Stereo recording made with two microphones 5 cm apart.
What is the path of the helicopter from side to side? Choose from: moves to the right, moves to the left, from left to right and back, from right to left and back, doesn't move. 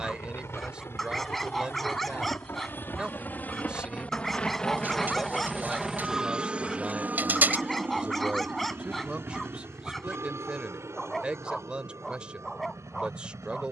moves to the right.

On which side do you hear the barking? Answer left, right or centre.
centre.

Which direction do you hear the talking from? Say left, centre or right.
right.